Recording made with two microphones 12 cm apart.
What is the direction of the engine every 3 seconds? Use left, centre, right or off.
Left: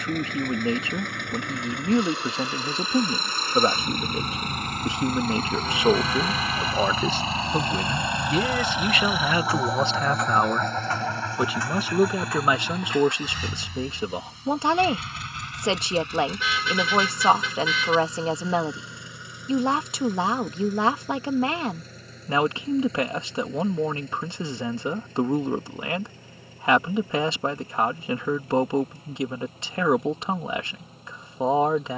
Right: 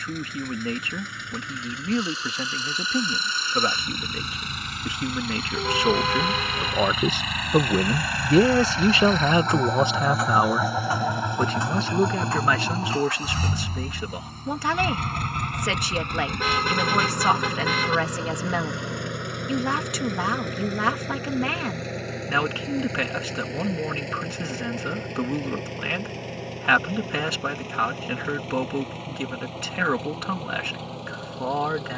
left, left, left, centre, right, right, right, right, right, right, right.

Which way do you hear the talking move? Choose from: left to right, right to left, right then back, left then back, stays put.
right then back.